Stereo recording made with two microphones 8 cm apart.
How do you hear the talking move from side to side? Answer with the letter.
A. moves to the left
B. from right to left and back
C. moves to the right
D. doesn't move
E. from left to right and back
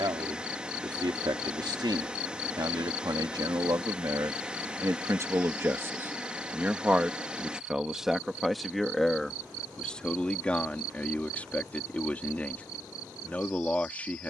A.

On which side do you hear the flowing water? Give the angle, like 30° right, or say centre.
10° right.